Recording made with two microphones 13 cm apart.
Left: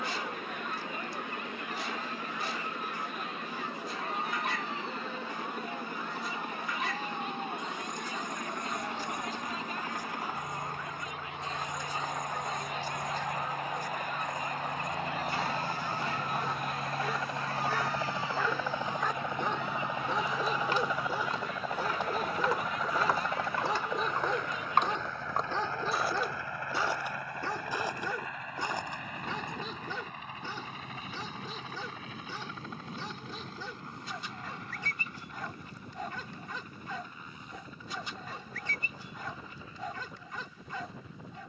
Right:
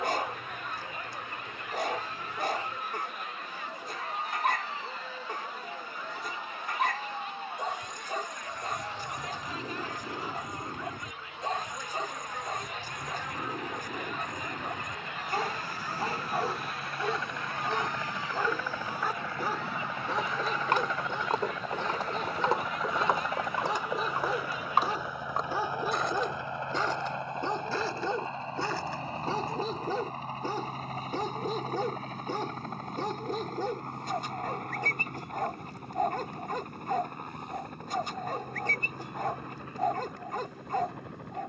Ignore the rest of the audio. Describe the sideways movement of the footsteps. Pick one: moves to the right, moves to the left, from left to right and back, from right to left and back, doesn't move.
moves to the left.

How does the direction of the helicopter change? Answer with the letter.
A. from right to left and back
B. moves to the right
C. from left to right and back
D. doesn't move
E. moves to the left
B.